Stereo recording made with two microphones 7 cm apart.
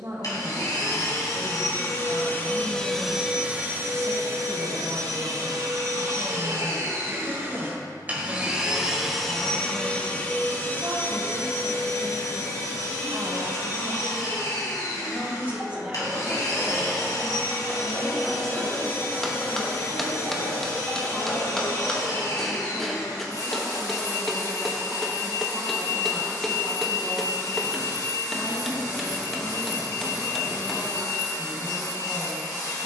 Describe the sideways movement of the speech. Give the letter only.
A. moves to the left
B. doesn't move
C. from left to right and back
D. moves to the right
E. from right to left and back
A.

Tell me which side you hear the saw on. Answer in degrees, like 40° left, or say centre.
10° left.